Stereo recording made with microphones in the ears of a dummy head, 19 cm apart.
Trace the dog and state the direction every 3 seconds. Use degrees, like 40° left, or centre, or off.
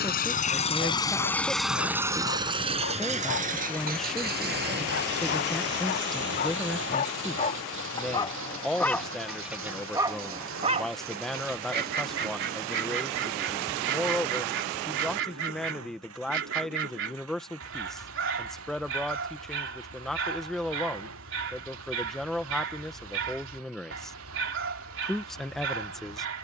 60° left, 50° left, 20° left, 20° right, 60° right, 60° right, 60° right, 60° right, 60° right.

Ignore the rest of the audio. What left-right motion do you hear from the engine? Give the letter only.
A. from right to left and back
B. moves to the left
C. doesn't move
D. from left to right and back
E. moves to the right
E.